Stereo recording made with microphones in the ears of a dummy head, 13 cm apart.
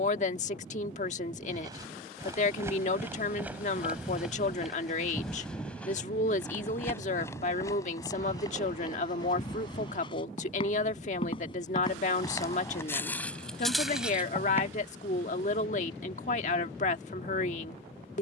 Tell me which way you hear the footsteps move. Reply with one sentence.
In this clip you hear the footsteps go left and come back.